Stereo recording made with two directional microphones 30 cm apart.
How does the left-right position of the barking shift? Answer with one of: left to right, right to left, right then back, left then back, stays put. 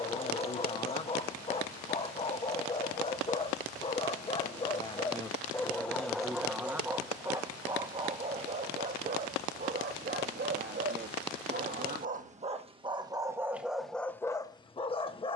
right then back.